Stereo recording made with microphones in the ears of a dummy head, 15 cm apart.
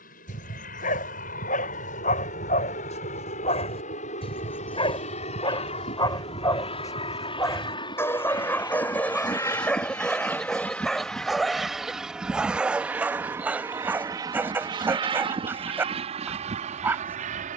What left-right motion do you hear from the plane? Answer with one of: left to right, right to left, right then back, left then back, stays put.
left to right.